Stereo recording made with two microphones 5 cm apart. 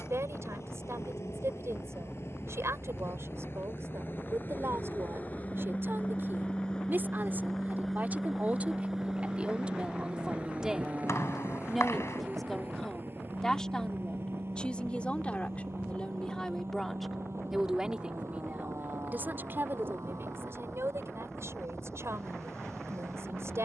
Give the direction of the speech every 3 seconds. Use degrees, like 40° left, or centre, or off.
60° right, 50° right, 30° right, 20° right, 10° left, 10° left, 40° right, 60° right.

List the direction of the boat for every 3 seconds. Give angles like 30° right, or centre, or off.
60° left, 40° left, 10° left, 20° right, 40° right, 50° right, 60° right, 60° right.